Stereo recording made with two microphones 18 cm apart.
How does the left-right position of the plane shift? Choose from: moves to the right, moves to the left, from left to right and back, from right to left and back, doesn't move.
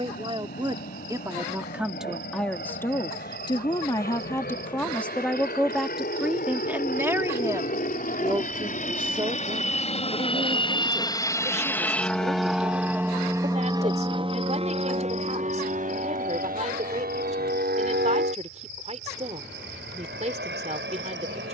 moves to the right.